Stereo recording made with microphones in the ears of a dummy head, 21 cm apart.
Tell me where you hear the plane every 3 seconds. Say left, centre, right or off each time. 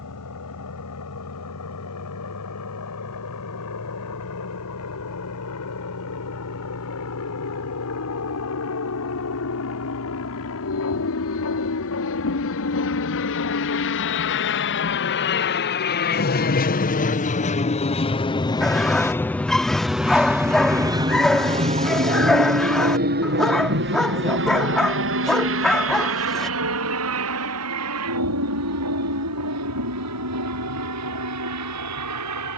left, left, left, left, left, left, centre, right, right, right, right.